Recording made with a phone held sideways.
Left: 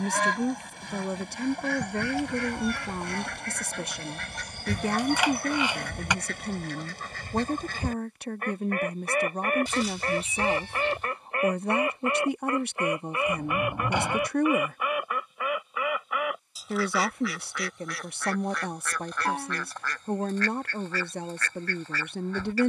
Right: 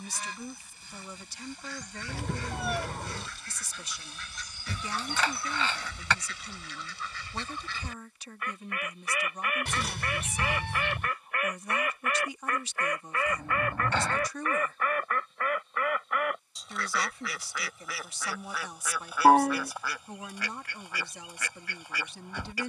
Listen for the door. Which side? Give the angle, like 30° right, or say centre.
20° left.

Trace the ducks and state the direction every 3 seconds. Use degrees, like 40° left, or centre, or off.
70° left, 60° left, 50° left, 30° left, 20° left, centre, 10° right, 10° right.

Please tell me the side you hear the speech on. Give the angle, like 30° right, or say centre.
60° left.